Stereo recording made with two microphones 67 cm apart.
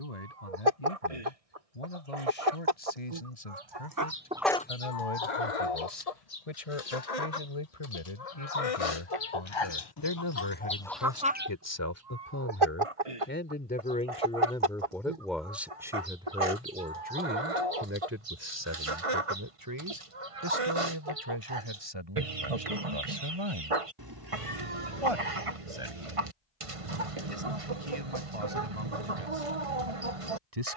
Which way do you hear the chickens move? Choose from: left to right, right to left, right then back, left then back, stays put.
left then back.